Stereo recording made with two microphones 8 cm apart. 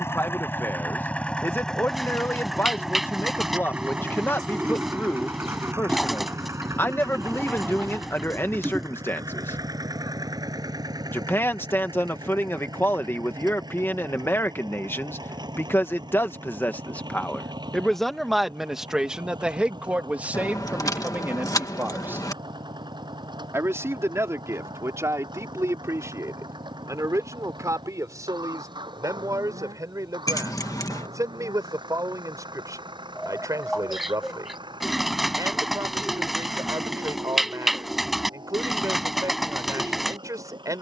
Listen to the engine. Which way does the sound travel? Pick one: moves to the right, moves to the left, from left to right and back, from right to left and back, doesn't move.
moves to the right.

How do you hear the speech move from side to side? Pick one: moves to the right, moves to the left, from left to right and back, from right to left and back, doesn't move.
moves to the right.